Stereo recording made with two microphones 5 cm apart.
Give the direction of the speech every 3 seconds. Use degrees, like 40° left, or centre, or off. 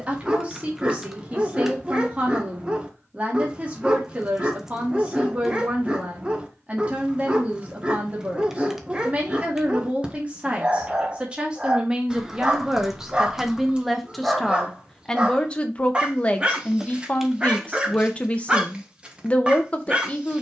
30° right, 30° right, 30° right, 30° right, 10° right, 20° left, 20° left.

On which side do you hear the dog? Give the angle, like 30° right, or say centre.
20° right.